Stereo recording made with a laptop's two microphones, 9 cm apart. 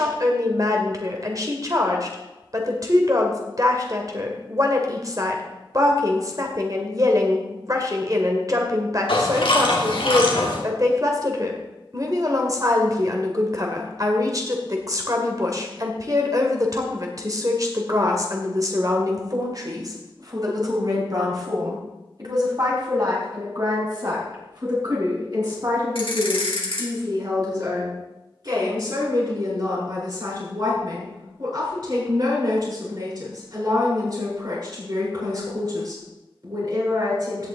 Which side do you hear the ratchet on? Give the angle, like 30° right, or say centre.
70° left.